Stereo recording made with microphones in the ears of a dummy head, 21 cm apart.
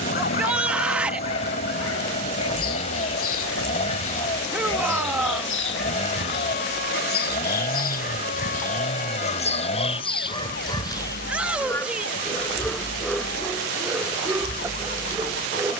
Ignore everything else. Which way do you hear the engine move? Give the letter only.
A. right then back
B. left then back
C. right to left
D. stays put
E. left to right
D.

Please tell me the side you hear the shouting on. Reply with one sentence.
In this clip you hear the shouting in the centre.